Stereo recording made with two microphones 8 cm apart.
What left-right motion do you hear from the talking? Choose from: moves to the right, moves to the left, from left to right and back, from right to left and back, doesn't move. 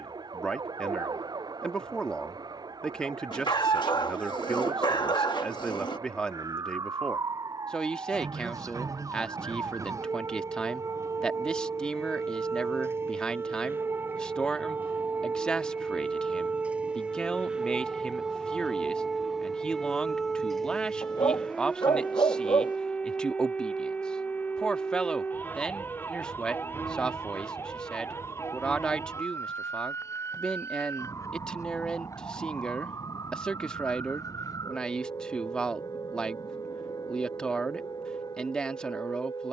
doesn't move.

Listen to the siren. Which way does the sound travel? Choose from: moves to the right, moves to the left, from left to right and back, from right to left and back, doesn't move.
moves to the left.